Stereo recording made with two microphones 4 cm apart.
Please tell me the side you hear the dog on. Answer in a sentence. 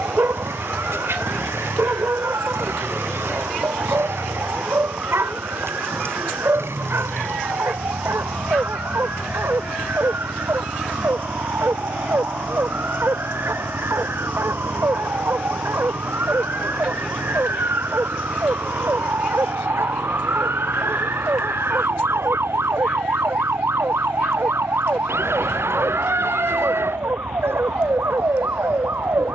You can hear the dog on the right.